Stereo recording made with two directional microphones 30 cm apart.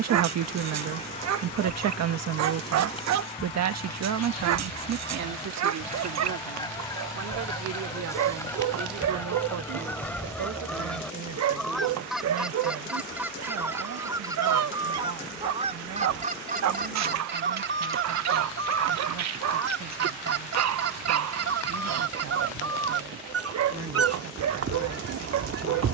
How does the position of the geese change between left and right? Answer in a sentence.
In this clip you hear the geese move to the right.